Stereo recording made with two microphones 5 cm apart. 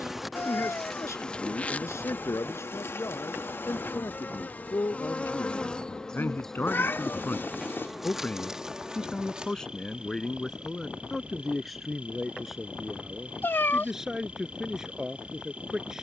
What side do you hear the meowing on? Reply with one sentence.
You can hear the meowing on the left.